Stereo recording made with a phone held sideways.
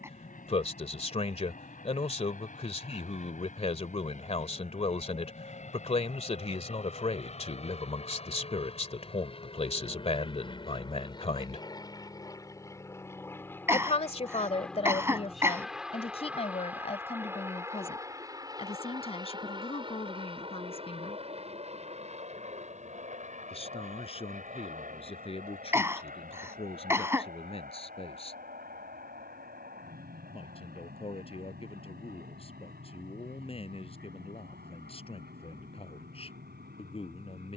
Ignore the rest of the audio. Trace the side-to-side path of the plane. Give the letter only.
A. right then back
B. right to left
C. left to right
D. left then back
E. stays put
C.